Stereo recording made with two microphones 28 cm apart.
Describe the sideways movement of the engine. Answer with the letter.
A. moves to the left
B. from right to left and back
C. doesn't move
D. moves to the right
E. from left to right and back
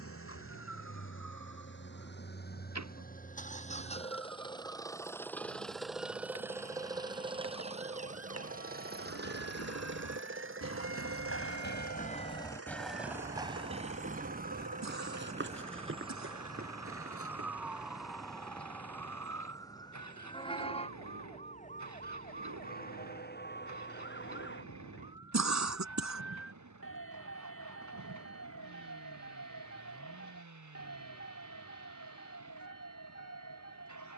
D.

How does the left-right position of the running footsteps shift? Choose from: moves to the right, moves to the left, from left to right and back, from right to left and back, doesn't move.
moves to the right.